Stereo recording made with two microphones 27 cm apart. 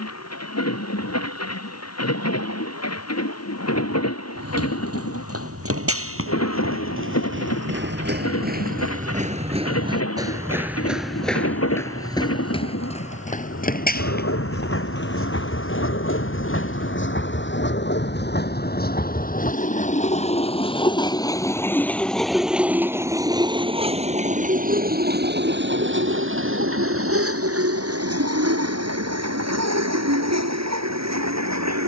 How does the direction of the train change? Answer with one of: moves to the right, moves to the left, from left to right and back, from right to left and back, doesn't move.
moves to the right.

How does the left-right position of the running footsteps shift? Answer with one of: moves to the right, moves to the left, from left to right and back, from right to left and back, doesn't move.
moves to the left.